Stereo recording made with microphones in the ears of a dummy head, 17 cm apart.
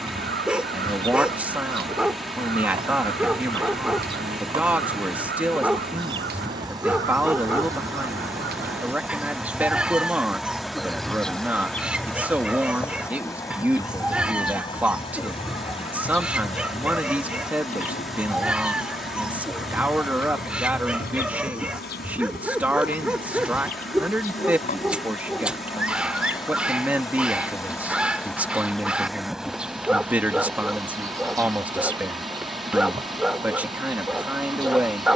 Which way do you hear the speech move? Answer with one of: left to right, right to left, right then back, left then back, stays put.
stays put.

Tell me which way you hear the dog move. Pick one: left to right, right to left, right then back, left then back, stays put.
stays put.